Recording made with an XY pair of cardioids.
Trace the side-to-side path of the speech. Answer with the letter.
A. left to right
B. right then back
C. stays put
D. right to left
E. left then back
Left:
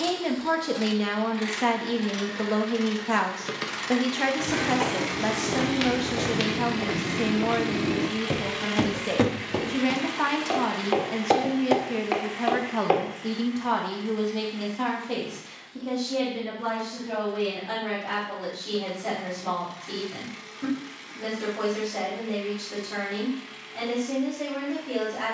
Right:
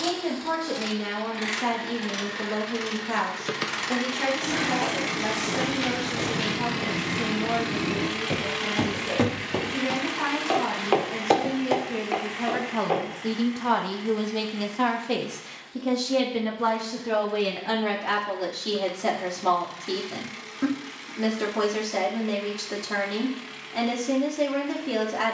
A.